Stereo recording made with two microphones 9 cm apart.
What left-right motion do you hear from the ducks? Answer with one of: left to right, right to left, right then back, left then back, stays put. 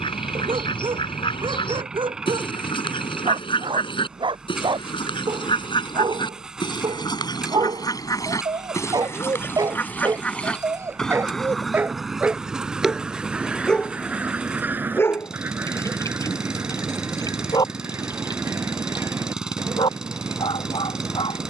left to right.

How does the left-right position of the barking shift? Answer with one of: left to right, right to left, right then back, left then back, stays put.
right to left.